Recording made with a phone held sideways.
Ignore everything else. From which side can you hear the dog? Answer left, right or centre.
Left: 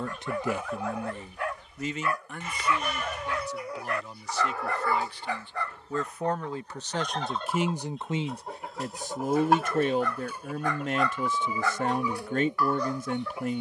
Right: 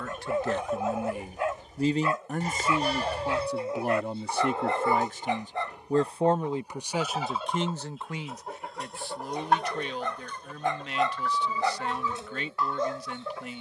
right.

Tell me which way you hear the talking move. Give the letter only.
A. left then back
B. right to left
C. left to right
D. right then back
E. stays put
D.